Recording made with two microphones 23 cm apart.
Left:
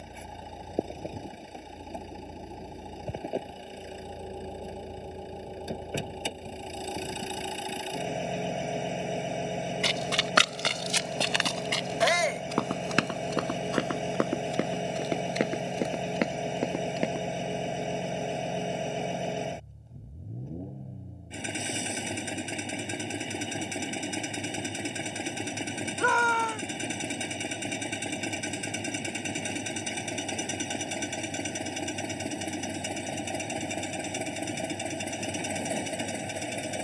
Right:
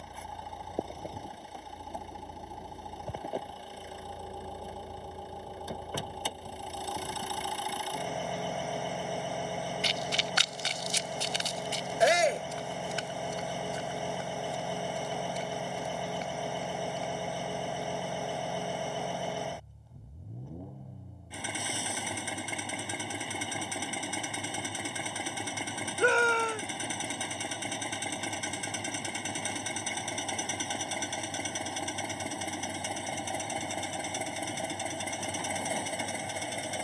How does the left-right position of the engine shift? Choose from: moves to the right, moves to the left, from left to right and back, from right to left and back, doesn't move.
doesn't move.